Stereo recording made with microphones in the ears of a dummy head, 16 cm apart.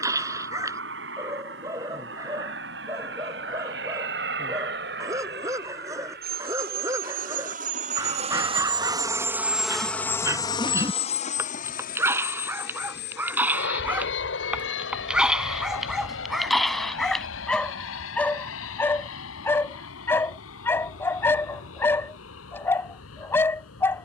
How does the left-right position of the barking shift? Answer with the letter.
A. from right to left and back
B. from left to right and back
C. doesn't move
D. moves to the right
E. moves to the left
E.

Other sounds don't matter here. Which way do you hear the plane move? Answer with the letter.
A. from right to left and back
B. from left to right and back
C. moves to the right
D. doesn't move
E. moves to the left
E.